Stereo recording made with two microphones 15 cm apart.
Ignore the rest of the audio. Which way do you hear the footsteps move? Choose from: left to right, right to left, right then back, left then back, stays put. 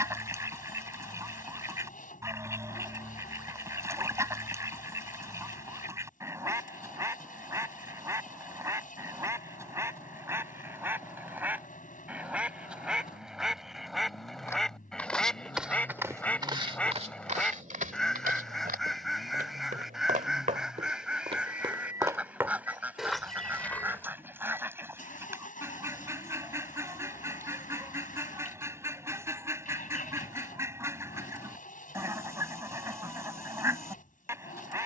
right then back.